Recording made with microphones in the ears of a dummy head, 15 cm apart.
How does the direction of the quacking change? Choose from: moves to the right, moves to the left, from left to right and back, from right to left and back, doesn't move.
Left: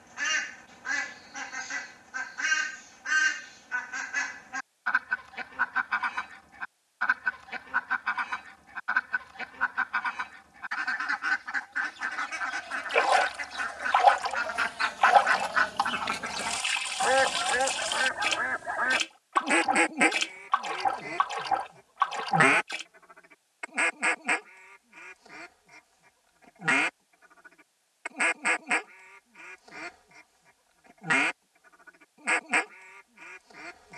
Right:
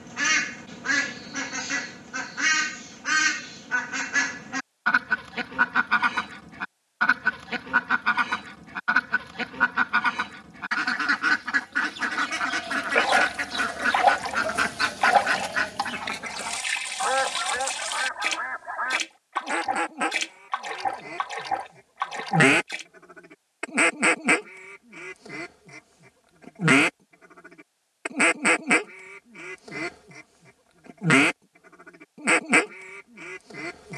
from right to left and back.